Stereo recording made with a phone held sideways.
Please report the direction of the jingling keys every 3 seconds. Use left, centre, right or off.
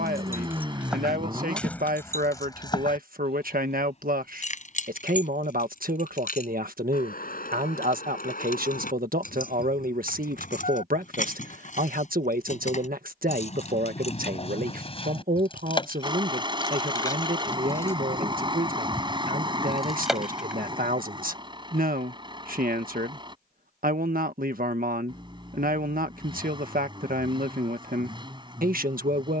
centre, left, left, left, left, left, centre, off, off, off.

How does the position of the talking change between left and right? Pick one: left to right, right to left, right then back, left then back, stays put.
stays put.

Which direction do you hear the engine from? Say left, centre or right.
right.